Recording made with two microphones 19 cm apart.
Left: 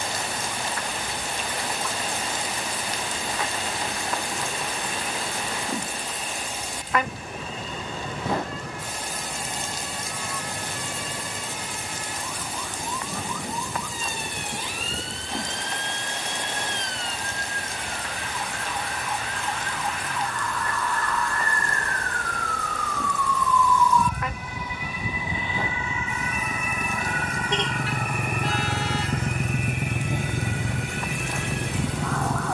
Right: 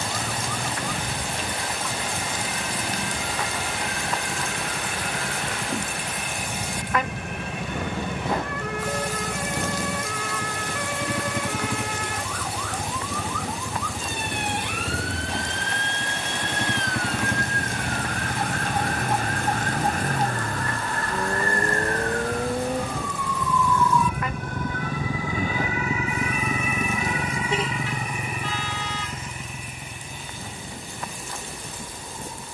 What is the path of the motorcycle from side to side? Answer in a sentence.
In this clip you hear the motorcycle go from the right side to the left.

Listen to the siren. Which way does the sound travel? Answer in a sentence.
In this clip you hear the siren travel towards the left.